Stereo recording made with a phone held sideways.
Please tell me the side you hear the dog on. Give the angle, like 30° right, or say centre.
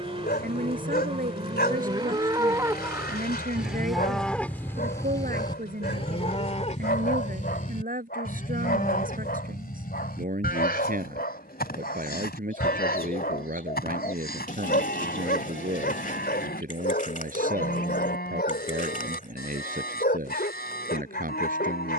80° left.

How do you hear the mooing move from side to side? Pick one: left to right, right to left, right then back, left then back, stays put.
right to left.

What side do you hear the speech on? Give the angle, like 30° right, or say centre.
60° right.